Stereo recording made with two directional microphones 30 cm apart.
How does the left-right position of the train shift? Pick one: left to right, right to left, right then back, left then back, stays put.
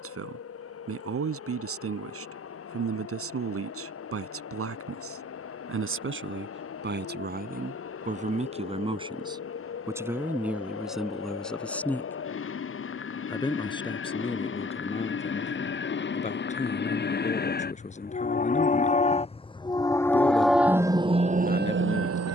left to right.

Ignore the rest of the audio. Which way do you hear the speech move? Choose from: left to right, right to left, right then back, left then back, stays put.
right to left.